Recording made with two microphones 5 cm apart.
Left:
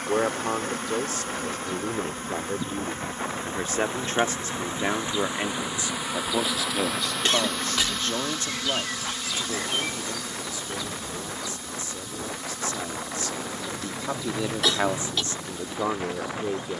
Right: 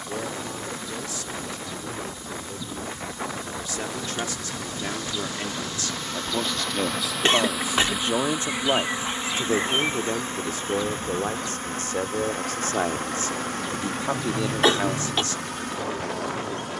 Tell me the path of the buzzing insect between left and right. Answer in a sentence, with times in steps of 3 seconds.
In this clip you hear the buzzing insect on the left from 0 s, in the centre from 6 s and on the right from 9 s.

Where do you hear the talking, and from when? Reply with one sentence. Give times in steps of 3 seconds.
You can hear the talking on the left from 0 s, in the centre from 6 s, on the right from 9 s and on the left from 15 s.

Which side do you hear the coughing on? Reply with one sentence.
You can hear the coughing on the right.